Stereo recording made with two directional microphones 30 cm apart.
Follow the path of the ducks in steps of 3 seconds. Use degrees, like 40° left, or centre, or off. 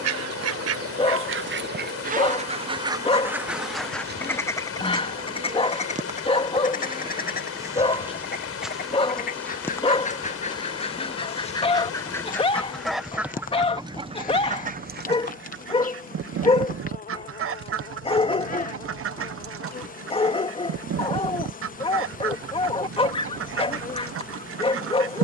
40° right, 10° left, 30° left, 20° left, 10° right, 50° right, 50° right, 50° right, 50° right.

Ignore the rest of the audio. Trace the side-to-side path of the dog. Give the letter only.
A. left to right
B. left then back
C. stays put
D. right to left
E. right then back
C.